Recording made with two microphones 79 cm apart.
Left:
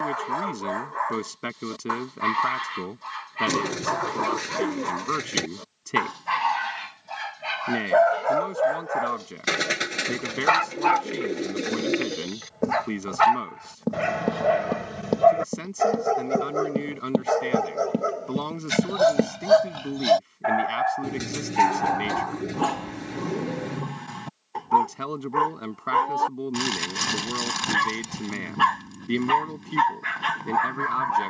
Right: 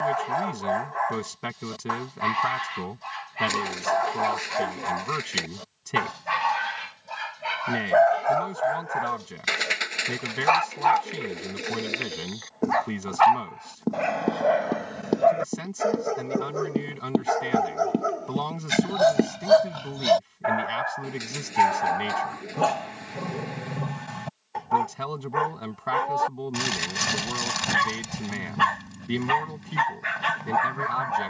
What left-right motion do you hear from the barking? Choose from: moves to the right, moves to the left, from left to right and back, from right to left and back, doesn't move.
from right to left and back.